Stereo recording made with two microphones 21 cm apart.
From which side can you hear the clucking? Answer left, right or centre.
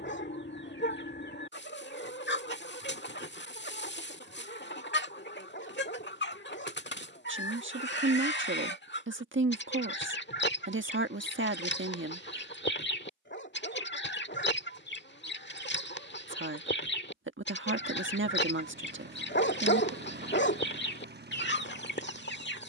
left.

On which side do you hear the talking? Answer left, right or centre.
right.